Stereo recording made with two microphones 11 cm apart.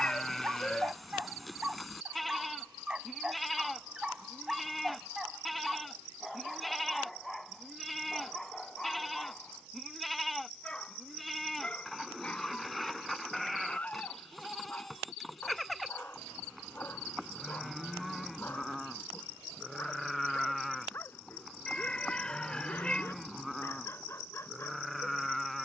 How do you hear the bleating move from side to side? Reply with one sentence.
In this clip you hear the bleating stay put.